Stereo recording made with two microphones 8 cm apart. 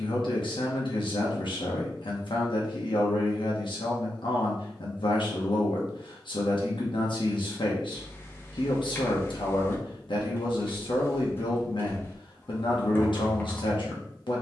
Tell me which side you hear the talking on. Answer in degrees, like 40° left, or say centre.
80° left.